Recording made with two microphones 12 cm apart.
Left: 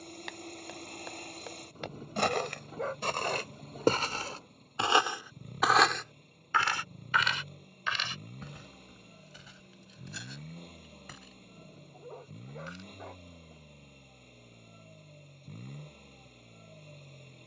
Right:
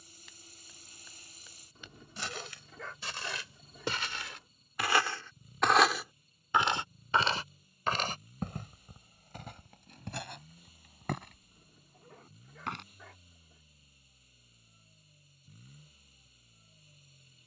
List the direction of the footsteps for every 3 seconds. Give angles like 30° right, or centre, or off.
70° left, 30° left, 40° right, 60° right, 70° right, off.